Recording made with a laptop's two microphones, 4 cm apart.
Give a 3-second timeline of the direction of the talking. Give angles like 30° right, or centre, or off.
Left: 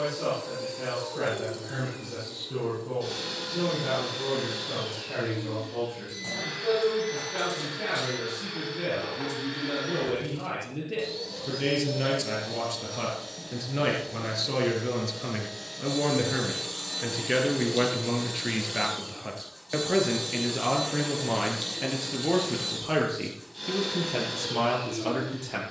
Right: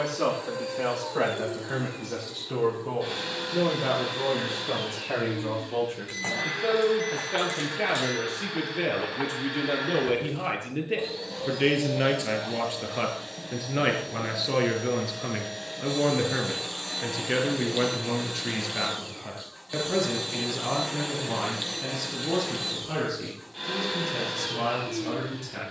70° right, 60° right, 50° right, 40° right, 20° right, centre, 20° left, 40° left, 50° left.